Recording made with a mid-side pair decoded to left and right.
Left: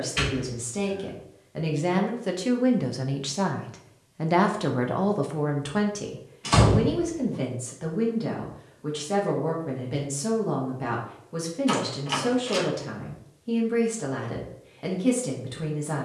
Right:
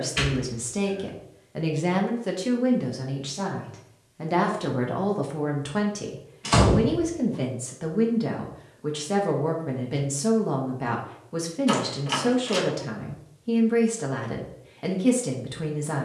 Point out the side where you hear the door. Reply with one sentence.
You can hear the door in the centre.